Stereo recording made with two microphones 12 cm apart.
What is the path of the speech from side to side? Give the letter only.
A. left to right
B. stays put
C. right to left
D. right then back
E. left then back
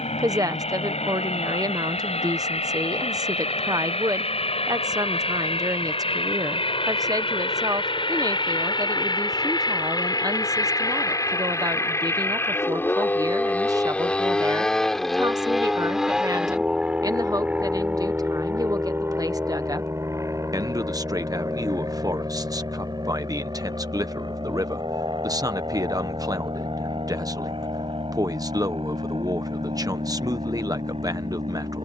B.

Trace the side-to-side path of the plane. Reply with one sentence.
You can hear the plane move to the right.